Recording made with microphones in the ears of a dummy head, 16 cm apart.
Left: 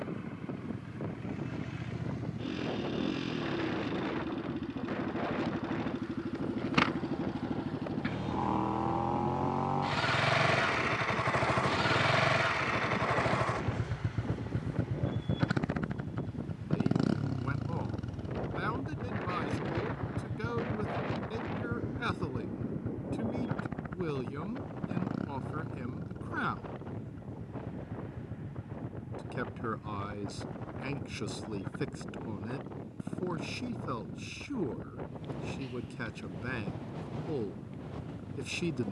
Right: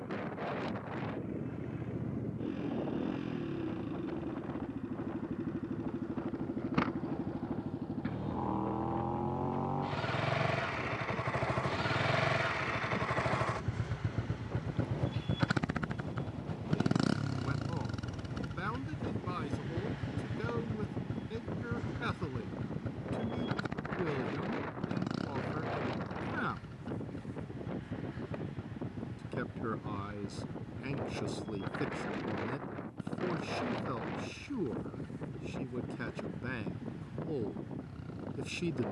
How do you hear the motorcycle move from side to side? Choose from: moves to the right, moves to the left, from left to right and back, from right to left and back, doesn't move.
moves to the right.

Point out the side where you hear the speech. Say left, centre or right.
centre.